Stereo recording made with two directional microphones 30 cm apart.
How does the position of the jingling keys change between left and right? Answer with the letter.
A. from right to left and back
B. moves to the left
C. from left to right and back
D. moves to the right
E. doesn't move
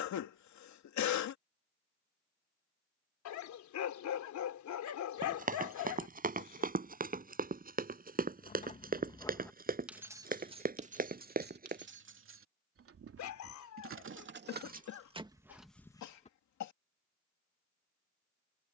C.